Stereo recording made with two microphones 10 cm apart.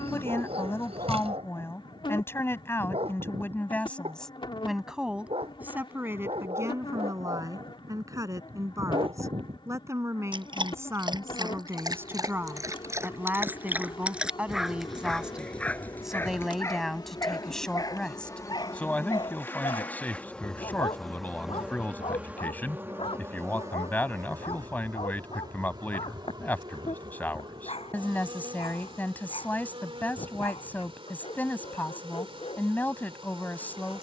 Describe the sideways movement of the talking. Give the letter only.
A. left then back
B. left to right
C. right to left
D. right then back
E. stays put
D.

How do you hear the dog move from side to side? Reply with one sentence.
You can hear the dog move from right to left.